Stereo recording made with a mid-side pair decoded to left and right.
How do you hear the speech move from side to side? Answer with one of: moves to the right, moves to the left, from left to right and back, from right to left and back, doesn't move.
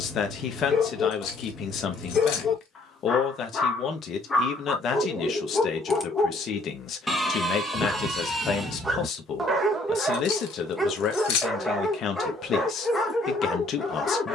doesn't move.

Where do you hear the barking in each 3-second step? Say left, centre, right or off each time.
left, left, centre, centre, left.